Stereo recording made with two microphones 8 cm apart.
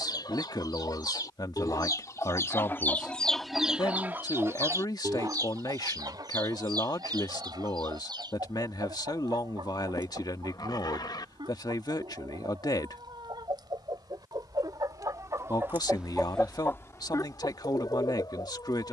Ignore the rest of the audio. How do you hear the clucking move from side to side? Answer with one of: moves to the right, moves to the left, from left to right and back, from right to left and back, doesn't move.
from left to right and back.